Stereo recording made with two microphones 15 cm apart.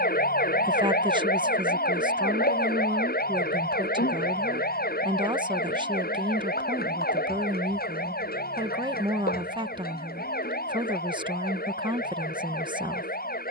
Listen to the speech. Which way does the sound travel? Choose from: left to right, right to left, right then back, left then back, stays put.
stays put.